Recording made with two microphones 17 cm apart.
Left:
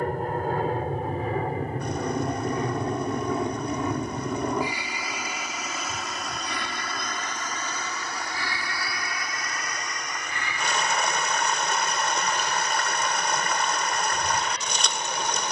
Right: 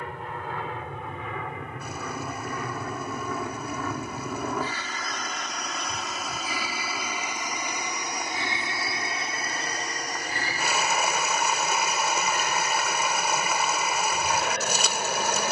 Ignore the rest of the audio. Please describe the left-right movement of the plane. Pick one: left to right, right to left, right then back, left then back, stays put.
left to right.